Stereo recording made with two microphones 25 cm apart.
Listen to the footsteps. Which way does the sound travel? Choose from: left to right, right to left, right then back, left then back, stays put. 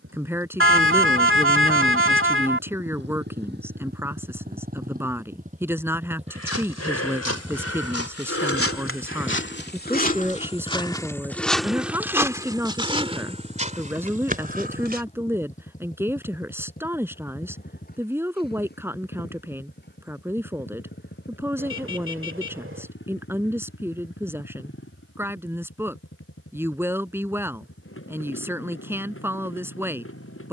left to right.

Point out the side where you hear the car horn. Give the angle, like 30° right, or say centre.
60° right.